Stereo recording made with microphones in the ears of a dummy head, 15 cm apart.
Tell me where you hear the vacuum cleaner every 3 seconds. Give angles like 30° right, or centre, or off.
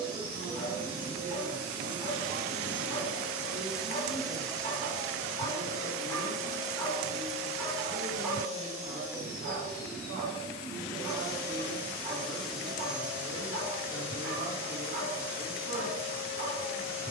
20° right, 10° left, 30° left, 30° left, 10° right, 10° right.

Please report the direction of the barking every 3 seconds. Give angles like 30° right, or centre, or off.
40° left, 40° left, centre, 30° right, 50° right, 50° right.